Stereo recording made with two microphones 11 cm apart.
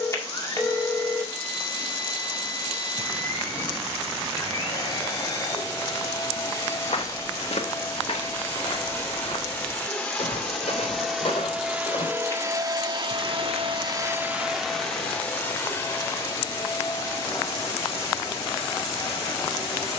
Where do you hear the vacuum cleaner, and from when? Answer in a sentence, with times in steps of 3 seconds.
In this clip you hear the vacuum cleaner on the left from 0 s, in the centre from 9 s, on the right from 12 s and on the left from 15 s.